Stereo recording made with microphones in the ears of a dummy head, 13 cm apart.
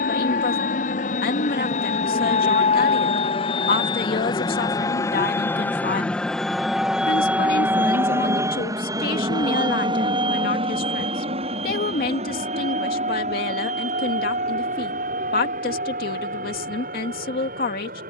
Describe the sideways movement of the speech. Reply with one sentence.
You can hear the speech stay in one place.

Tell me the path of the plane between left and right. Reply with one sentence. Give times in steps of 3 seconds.
You can hear the plane on the left from 0 s, in the centre from 6 s and on the right from 9 s.